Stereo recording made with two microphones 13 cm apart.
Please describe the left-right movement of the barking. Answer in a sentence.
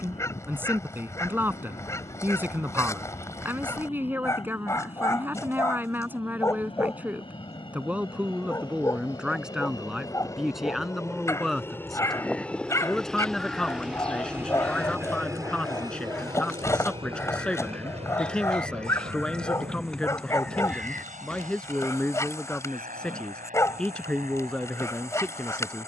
In this clip you hear the barking stay put.